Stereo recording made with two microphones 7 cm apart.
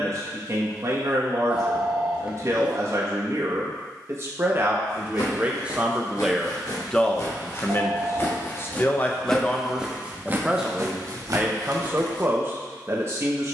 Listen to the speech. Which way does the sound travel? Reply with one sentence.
In this clip you hear the speech move from right to left and back again.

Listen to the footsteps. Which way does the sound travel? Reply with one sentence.
In this clip you hear the footsteps move from left to right.